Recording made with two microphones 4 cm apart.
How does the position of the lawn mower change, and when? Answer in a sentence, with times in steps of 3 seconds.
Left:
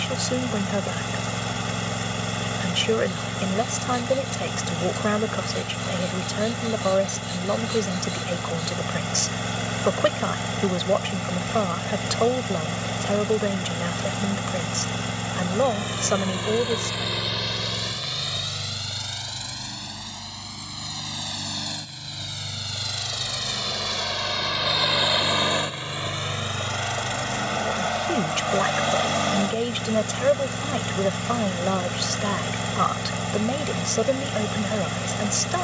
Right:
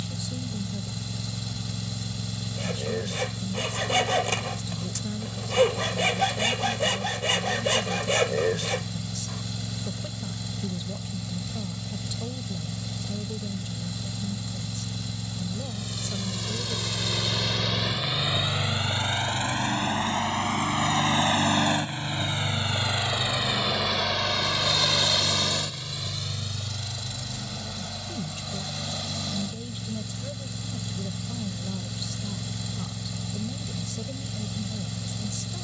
In this clip you hear the lawn mower on the left from 0 s, on the right from 18 s and on the left from 24 s.